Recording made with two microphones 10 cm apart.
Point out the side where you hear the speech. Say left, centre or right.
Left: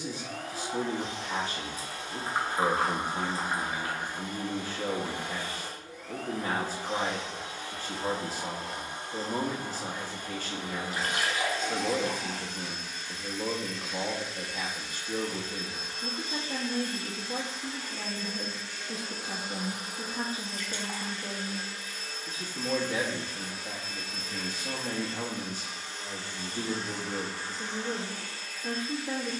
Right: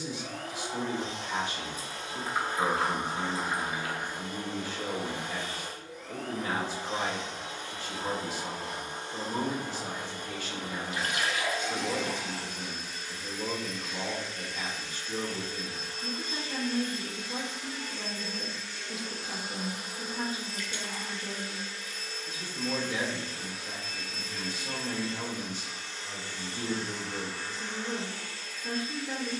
left.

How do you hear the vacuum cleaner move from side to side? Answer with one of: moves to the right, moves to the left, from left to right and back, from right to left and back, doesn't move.
moves to the left.